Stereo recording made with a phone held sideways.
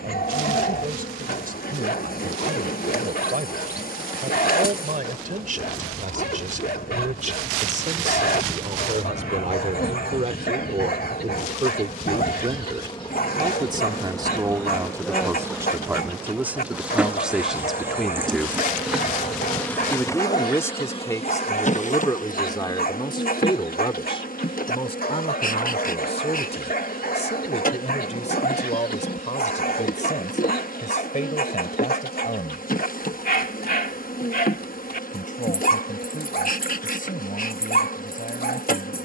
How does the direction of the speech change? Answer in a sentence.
You can hear the speech move from right to left.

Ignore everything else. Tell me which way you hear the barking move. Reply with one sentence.
You can hear the barking stay in one place.